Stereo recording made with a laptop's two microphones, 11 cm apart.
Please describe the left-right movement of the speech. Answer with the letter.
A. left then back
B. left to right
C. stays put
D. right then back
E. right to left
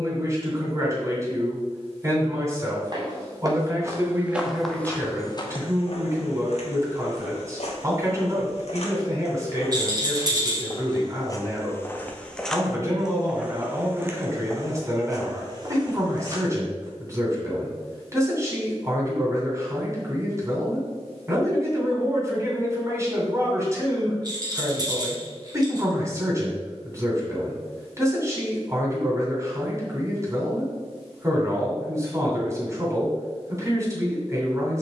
C.